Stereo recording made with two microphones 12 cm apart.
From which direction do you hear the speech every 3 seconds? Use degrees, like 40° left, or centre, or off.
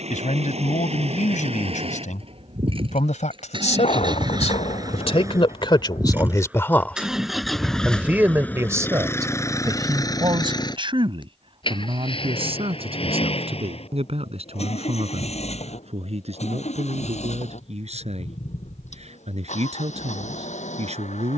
80° left, 60° left, centre, 40° right, 50° right, 60° right, 60° right.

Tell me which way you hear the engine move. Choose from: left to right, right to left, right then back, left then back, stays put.
right to left.